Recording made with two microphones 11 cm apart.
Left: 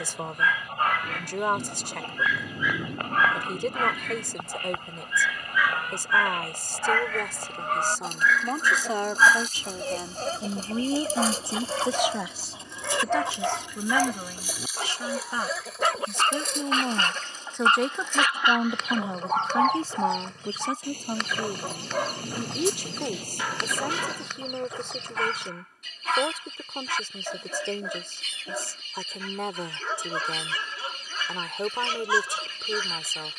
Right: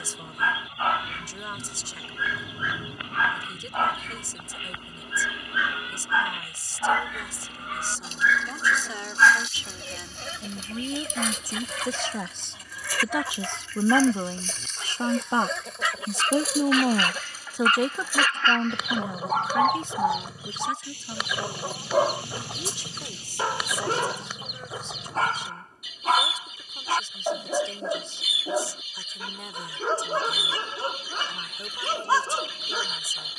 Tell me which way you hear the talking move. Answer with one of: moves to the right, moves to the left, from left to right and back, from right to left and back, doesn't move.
from left to right and back.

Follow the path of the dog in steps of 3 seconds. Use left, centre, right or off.
right, right, centre, left, left, left, centre, right, right, right, right.